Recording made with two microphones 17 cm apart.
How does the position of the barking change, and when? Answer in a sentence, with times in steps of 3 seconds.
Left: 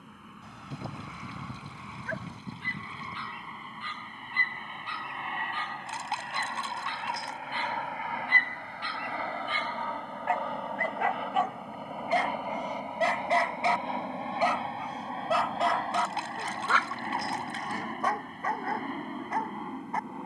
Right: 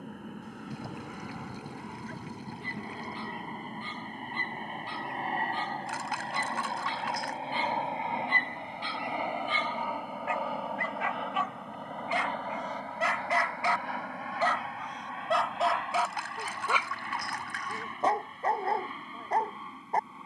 In this clip you hear the barking on the left from 0 s, in the centre from 15 s and on the right from 18 s.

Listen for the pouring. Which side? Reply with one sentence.
You can hear the pouring on the left.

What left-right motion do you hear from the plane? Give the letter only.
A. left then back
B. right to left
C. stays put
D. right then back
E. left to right
B.